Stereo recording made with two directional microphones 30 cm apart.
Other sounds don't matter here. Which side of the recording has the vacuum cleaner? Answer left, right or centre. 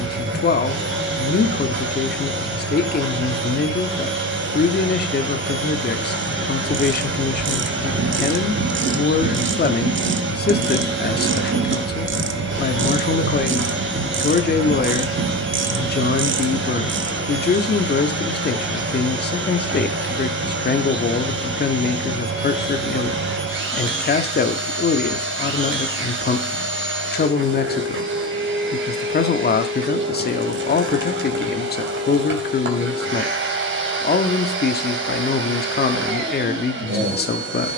right.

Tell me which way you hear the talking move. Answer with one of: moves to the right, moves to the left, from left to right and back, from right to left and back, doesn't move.
doesn't move.